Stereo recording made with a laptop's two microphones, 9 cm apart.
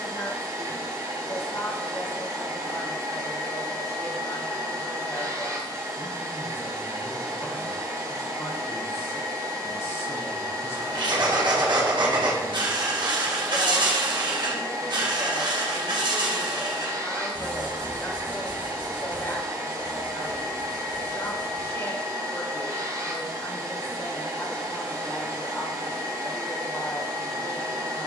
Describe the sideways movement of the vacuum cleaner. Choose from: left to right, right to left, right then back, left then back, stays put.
stays put.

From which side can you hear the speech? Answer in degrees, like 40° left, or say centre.
30° left.